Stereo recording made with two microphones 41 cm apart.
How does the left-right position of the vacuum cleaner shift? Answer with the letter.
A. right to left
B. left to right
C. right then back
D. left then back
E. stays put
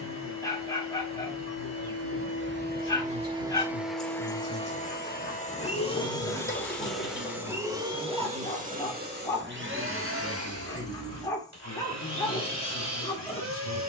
D.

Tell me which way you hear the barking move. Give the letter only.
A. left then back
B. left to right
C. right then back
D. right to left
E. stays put
E.